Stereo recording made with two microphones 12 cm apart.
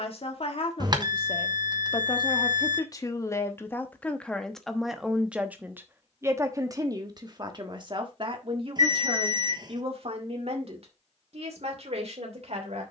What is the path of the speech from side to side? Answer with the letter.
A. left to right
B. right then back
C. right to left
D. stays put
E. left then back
A.